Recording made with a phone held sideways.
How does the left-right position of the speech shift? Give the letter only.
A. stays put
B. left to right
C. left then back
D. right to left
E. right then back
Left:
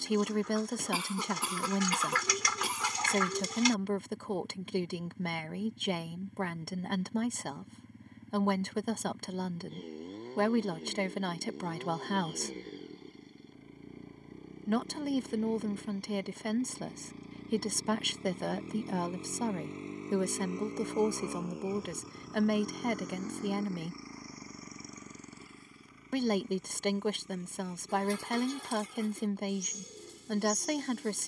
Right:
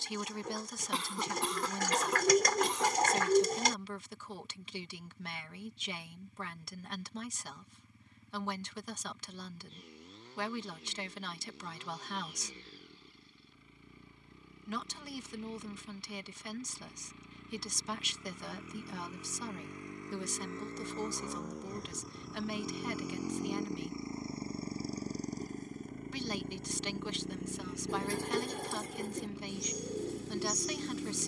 A.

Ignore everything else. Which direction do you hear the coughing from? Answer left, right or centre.
centre.